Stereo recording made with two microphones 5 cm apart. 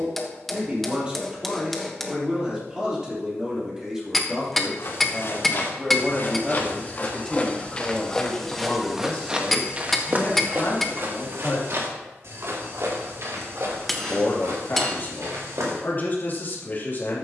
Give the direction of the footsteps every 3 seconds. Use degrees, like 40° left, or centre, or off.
off, 50° left, 20° left, 40° right, 70° right, 80° right.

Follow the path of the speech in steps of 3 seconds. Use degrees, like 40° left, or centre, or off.
20° right, 10° right, 10° left, 30° left, 40° left, 40° left.